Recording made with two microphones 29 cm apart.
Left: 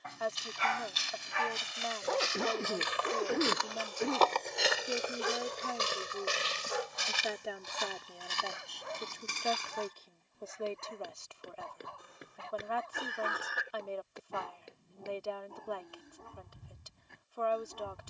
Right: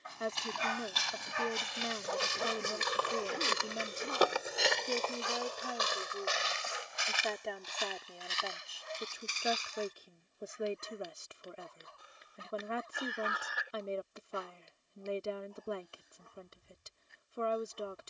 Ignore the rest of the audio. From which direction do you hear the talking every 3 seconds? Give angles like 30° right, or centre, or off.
30° right, 10° right, centre, 20° right, 20° right, 20° right.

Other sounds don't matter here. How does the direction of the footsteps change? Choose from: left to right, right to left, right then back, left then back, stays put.
right to left.